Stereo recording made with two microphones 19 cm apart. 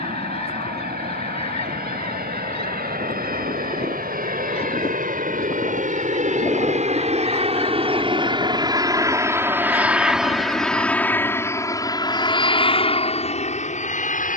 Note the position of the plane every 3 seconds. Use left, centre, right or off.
right, right, right, centre, left.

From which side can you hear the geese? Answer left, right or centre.
left.